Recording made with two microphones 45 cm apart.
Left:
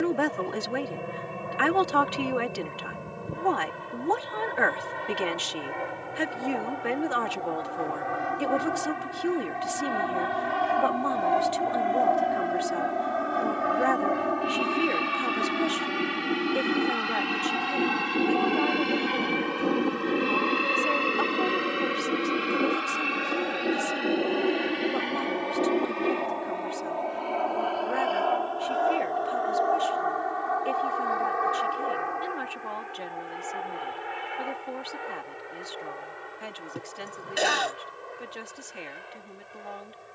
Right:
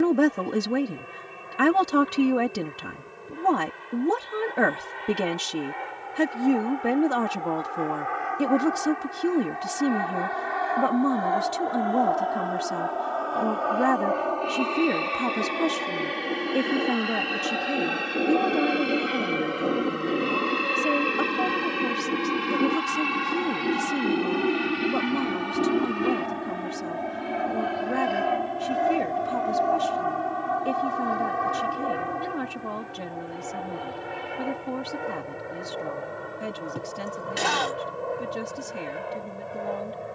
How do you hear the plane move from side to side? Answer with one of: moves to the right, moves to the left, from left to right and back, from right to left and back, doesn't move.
moves to the right.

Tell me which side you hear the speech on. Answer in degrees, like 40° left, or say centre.
50° right.